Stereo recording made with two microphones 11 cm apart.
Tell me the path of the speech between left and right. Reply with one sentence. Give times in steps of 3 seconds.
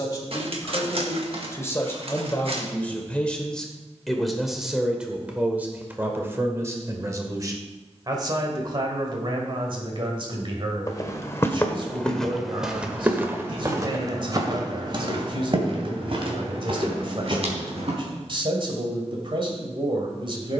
In this clip you hear the speech on the left from 0 s, in the centre from 3 s and on the right from 6 s.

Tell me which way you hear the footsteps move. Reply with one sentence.
In this clip you hear the footsteps move to the right.